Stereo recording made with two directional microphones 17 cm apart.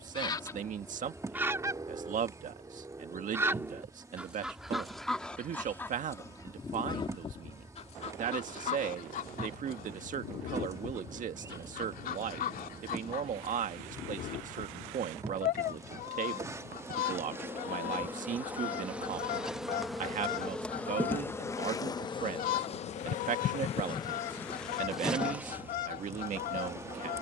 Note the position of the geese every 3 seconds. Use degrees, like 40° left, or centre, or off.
10° right, centre, 30° left, 60° left, 60° left, 60° left, 60° left, 60° left, 60° left.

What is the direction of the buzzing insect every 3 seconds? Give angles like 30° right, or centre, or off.
20° right, 20° right, 20° right, 20° right, 20° right, 20° right, centre, 30° left, 10° right.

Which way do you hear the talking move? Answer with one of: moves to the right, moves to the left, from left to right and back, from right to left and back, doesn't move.
doesn't move.